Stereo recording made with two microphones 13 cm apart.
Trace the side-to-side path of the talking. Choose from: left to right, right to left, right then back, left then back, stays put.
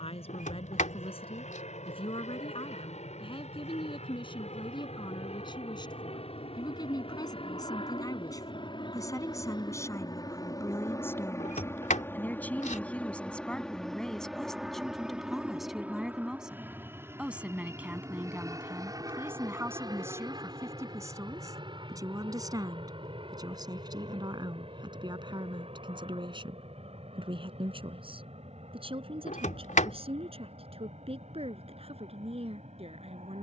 left to right.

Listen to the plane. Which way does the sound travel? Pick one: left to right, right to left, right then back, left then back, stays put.
left to right.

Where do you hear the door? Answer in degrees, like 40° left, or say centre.
80° left.